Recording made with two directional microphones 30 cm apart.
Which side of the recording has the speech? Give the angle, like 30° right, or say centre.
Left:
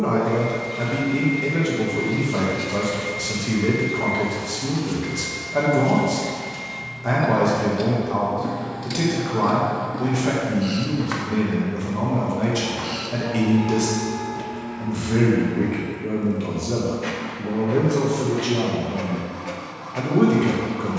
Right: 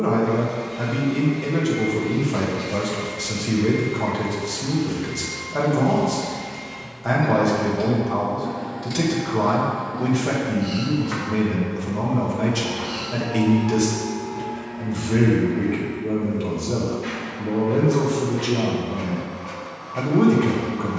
centre.